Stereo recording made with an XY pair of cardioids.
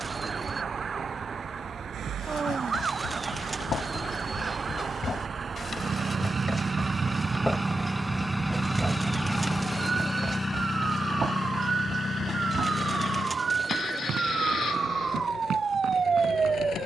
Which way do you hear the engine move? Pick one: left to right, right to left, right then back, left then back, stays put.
right to left.